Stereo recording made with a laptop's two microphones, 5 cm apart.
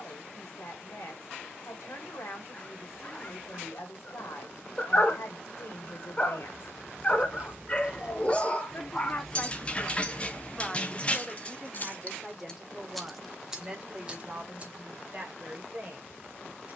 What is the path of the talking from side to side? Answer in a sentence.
You can hear the talking move to the right.